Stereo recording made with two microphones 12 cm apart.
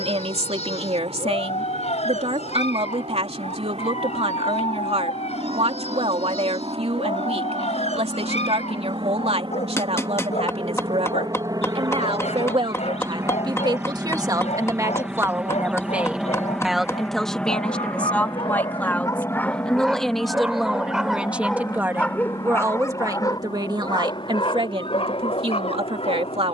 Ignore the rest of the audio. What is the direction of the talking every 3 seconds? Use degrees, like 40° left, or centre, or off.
60° right, 60° right, 60° right, 60° right, 40° right, centre, 10° left, 20° right, 50° right.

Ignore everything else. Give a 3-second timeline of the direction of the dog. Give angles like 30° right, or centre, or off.
80° left, 80° left, 80° left, 80° left, 80° left, 80° left, 20° left, 20° left, 60° left.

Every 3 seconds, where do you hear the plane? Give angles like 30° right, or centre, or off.
70° right, 60° right, 50° right, 40° right, 20° right, centre, 20° left, 40° left, 50° left.